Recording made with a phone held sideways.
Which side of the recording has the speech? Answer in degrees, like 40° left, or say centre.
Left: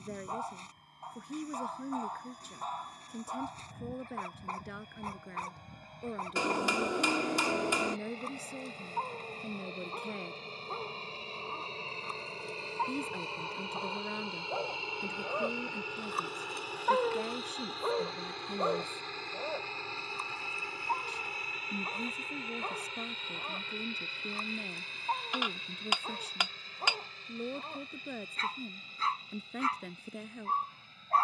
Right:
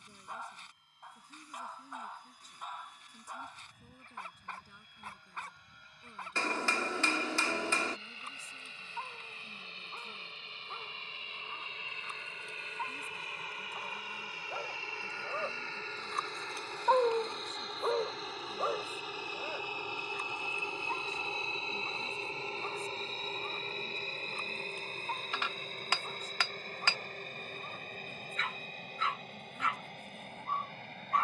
80° left.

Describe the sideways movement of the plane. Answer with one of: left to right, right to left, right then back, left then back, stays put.
left to right.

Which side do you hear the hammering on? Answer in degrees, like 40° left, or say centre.
20° left.